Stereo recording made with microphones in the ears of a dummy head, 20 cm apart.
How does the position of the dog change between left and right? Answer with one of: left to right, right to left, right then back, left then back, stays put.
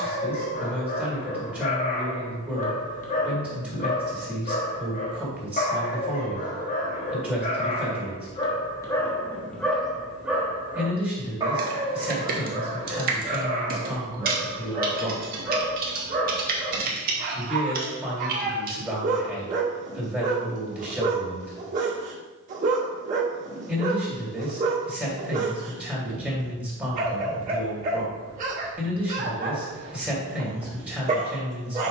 left to right.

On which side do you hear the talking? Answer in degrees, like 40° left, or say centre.
10° right.